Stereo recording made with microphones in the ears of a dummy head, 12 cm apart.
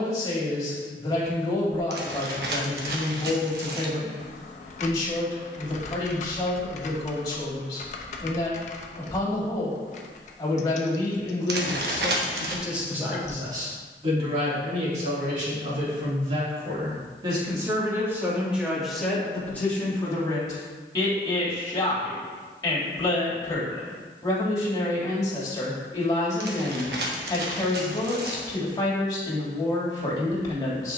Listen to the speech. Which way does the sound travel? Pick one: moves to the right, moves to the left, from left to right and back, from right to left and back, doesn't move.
from left to right and back.